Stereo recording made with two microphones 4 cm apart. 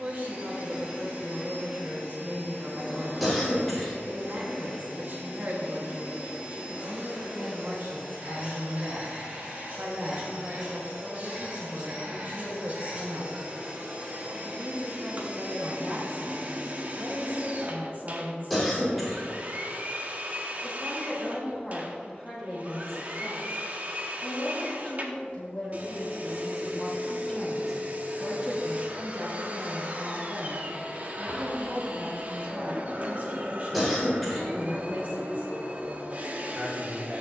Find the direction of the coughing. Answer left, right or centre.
centre.